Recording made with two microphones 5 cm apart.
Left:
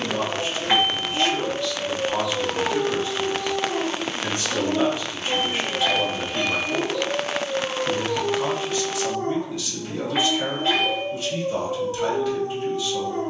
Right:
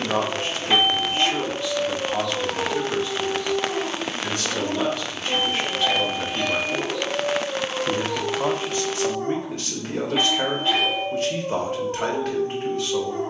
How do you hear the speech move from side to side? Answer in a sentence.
In this clip you hear the speech move from right to left and back again.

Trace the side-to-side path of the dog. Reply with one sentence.
You can hear the dog stay put.